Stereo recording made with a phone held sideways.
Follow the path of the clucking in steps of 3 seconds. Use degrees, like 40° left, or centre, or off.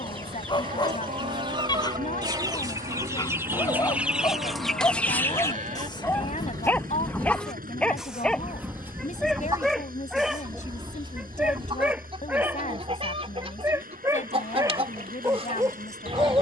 30° right, centre, 10° left, 30° right, 40° right, 40° right.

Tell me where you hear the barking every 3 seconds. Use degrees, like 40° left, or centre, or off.
30° left, 20° left, 10° left, centre, 20° right, 20° right.